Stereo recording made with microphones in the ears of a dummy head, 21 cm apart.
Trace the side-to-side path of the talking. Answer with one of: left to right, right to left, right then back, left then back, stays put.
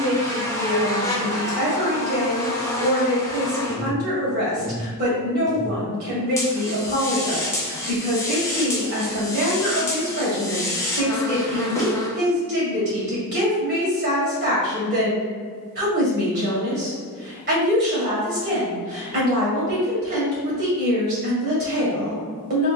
stays put.